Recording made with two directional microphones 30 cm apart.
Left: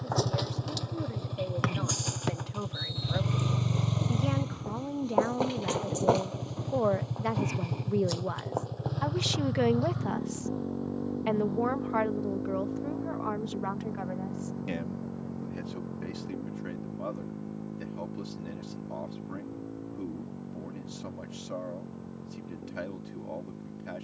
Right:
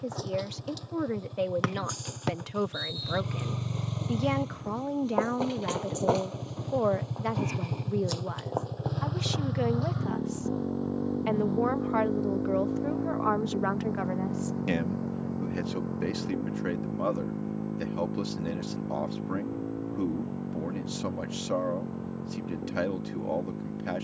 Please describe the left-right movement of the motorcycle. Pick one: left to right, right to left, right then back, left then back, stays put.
left to right.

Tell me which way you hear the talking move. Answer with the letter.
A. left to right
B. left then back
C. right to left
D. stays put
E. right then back
B.